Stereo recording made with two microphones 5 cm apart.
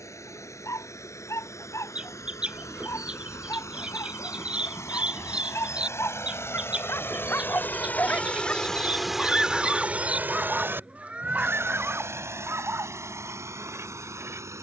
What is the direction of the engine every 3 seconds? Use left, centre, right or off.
left, left, left, right, right.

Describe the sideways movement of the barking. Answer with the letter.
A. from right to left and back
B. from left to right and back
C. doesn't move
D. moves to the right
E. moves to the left
D.